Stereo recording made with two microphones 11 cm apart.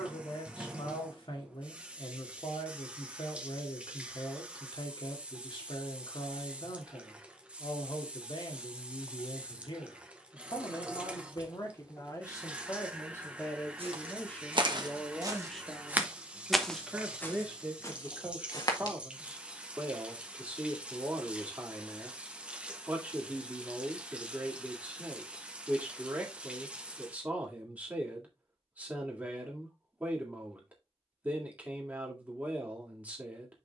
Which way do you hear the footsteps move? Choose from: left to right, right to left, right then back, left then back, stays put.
right to left.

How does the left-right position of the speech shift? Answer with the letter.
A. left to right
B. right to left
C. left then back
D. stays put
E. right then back
A.